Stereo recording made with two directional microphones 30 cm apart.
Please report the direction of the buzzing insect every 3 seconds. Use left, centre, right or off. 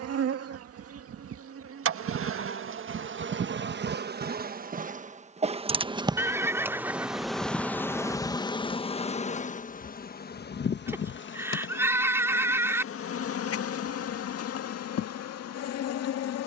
right, right, centre, left, left, left.